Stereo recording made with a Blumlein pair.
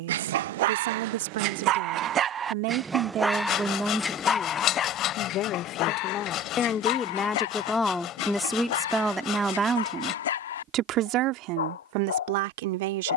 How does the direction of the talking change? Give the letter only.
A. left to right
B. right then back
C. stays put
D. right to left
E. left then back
E.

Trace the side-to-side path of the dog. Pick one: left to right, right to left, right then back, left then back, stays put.
right to left.